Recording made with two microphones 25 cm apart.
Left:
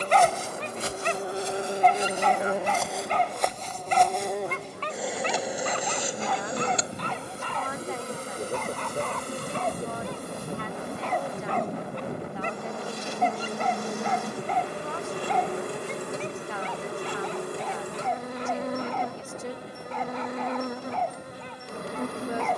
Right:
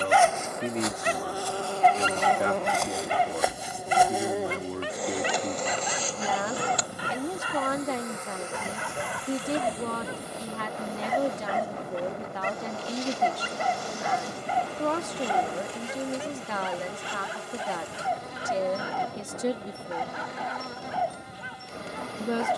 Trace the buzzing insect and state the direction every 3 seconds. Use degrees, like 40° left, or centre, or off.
20° left, centre, 30° left, 50° left, 60° left, 60° left, 60° left, 60° left.